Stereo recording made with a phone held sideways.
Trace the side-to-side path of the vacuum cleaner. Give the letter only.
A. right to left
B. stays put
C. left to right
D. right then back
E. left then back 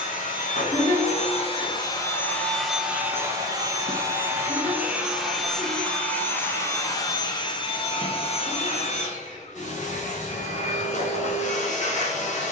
D.